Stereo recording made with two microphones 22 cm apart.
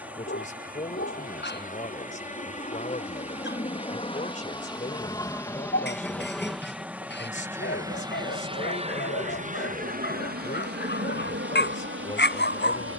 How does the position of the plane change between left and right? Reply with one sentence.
In this clip you hear the plane move to the right.